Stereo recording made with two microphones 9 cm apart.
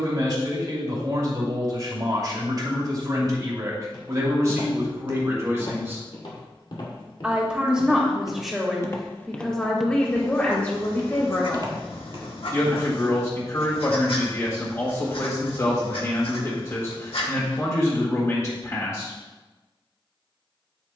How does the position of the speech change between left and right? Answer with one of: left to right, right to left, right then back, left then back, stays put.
right to left.